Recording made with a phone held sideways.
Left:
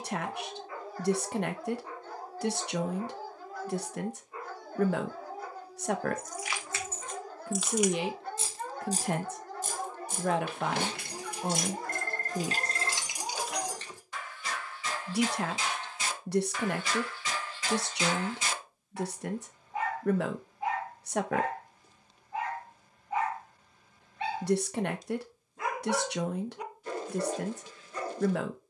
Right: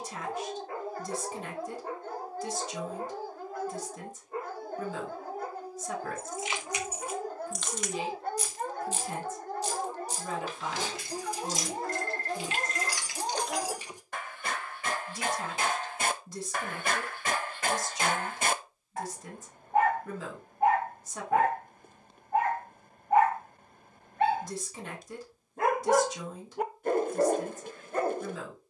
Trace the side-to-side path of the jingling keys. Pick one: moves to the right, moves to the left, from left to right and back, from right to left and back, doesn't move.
from right to left and back.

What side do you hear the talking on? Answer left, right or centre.
left.